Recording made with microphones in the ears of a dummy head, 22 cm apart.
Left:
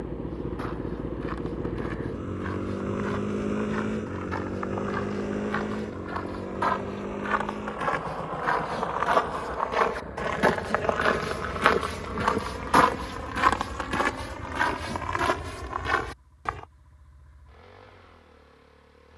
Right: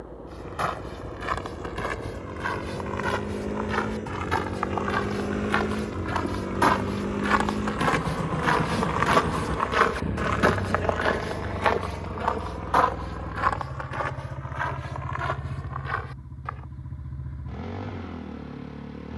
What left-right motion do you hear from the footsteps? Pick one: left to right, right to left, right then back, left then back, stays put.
right to left.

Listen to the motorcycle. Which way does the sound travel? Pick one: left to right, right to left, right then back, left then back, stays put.
left to right.